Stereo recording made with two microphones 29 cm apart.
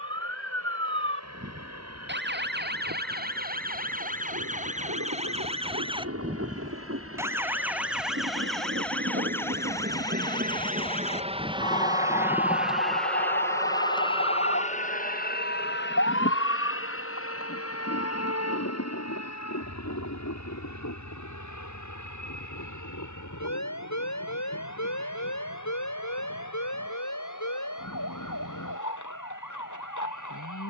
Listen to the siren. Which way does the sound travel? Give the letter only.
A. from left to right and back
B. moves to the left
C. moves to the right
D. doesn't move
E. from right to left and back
B.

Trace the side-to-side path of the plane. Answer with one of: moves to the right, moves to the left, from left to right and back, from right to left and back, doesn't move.
moves to the left.